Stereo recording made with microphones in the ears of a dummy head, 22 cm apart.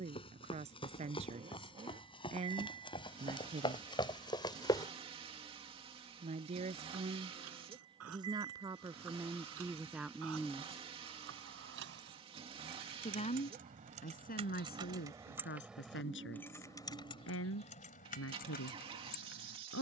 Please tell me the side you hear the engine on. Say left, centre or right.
right.